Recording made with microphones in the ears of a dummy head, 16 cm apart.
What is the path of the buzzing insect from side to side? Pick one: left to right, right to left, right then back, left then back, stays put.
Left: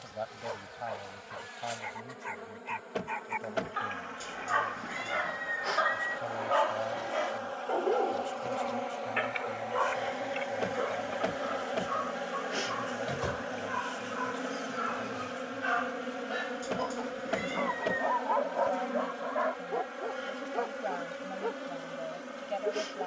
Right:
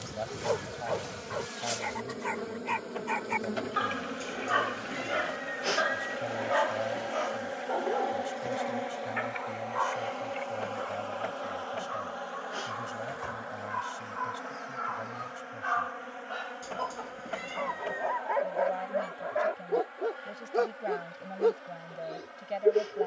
right to left.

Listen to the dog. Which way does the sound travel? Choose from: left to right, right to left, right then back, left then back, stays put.
left then back.